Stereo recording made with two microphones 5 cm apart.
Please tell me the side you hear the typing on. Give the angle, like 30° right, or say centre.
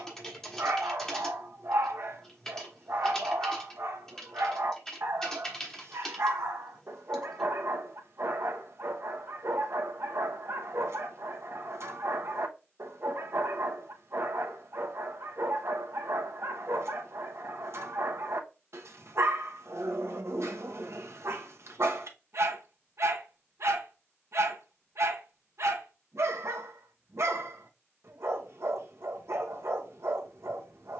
10° left.